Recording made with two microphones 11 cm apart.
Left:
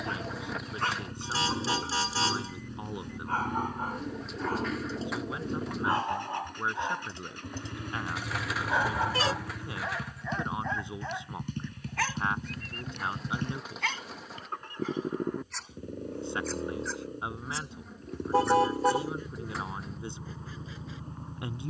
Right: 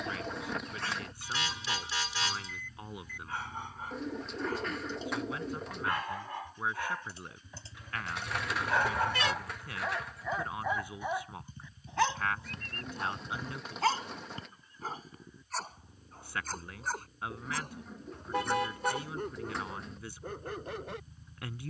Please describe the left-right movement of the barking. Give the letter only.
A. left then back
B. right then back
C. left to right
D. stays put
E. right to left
C.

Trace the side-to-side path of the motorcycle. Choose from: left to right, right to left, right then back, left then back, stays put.
stays put.